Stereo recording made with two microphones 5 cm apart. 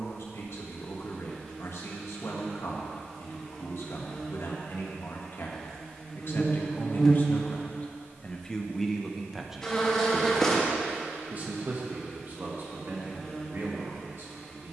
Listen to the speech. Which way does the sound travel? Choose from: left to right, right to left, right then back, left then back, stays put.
left to right.